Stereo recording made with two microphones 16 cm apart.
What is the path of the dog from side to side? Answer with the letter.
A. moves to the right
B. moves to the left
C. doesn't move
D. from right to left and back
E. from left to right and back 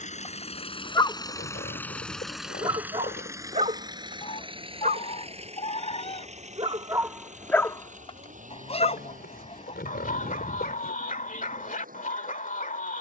E.